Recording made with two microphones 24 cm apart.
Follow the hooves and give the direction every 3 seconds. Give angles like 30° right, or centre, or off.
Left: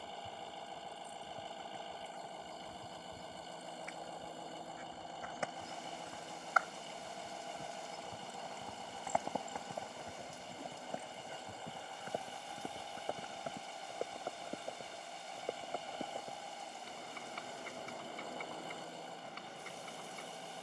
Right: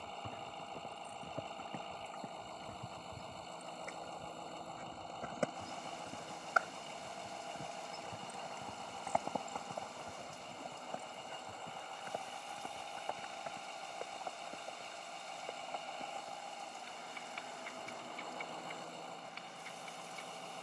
70° right, 50° right, 20° right, 10° left, 30° left, 40° left, 50° left.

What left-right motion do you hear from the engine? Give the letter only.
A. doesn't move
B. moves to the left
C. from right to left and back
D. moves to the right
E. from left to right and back
A.